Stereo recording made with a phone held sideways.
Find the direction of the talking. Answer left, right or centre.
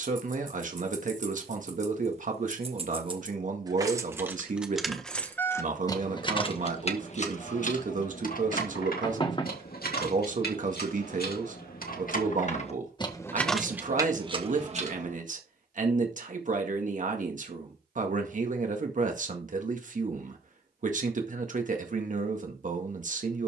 right.